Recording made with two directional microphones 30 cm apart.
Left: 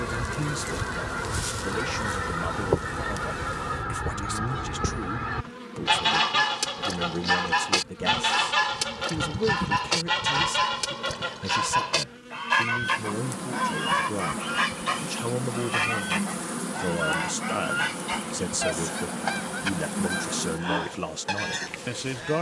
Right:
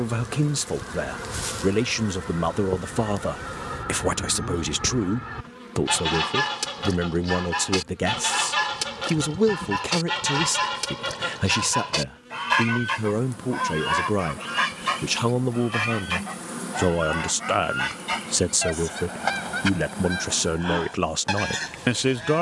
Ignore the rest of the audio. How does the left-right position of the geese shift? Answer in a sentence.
In this clip you hear the geese move to the right.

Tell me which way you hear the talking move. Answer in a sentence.
You can hear the talking stay in one place.